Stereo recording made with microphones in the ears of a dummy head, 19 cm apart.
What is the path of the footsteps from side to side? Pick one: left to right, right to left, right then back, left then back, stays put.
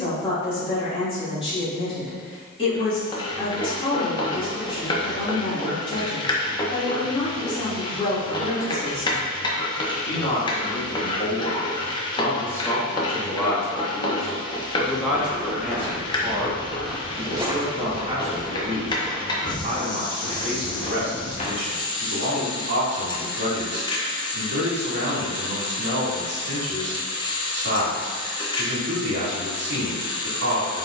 right then back.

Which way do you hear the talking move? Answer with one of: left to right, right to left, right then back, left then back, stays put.
left to right.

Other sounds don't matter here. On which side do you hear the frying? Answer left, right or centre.
left.